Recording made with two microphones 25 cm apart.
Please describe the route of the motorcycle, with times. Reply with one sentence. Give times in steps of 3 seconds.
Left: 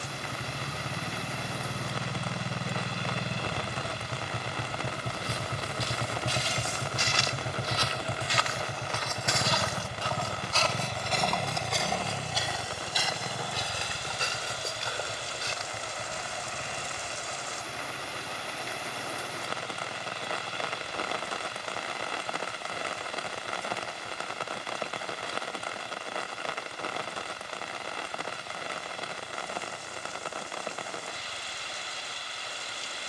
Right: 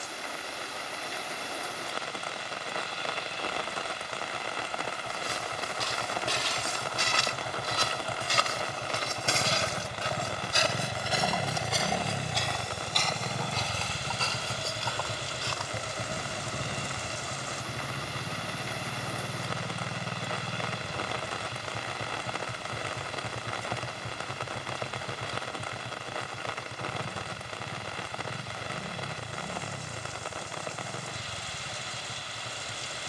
You can hear the motorcycle on the left from 0 s, in the centre from 9 s and on the right from 12 s.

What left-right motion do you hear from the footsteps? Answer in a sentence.
You can hear the footsteps move from right to left.